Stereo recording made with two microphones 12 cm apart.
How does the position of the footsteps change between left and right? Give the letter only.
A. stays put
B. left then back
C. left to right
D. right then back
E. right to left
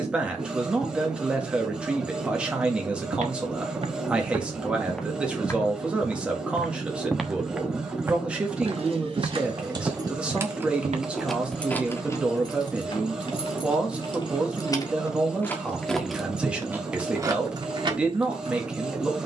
B.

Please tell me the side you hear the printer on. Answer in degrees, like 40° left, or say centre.
10° right.